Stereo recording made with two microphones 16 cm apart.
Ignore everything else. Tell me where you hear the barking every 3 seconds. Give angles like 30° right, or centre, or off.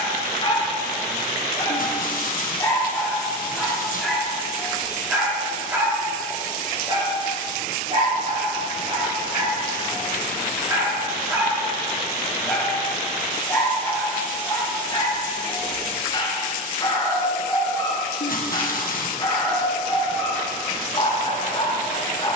30° left, centre, 30° right, 20° right, 10° left, 30° left, 30° left, 30° left.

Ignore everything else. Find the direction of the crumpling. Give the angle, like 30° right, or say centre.
60° left.